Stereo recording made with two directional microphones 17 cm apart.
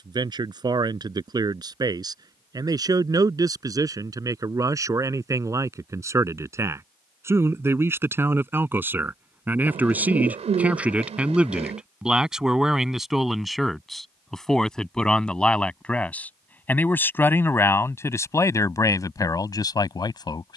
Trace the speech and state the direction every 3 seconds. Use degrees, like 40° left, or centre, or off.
20° right, 20° right, 10° right, 10° right, centre, 10° left, 20° left.